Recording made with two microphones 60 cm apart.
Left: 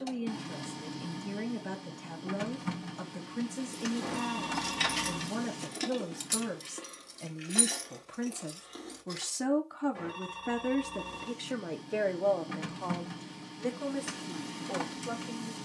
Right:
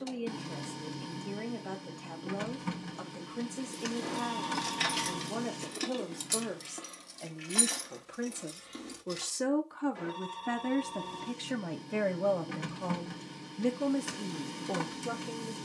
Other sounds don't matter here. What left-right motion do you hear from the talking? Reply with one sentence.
In this clip you hear the talking move from left to right.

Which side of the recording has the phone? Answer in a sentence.
You can hear the phone on the left.